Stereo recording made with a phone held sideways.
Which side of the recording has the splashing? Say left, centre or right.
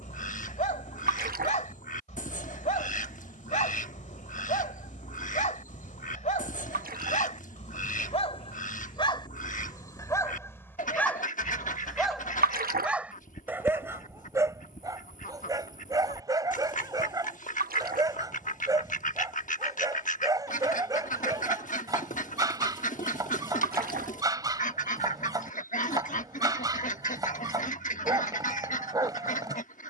right.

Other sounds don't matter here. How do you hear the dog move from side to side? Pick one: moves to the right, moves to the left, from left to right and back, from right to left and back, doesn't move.
moves to the right.